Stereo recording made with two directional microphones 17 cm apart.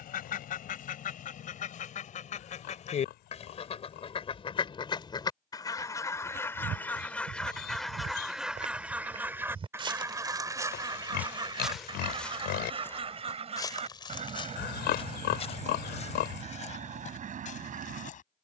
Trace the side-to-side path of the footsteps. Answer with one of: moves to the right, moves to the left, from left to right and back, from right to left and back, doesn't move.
moves to the left.